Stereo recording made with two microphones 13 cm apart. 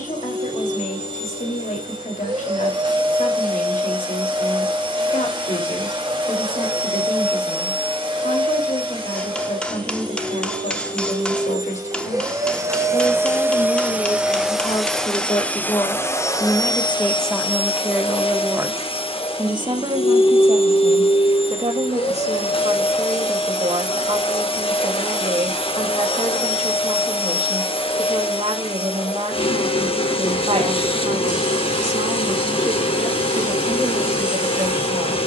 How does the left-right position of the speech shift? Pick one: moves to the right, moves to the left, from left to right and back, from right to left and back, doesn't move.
moves to the right.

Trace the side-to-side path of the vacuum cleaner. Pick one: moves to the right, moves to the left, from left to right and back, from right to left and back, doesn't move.
moves to the left.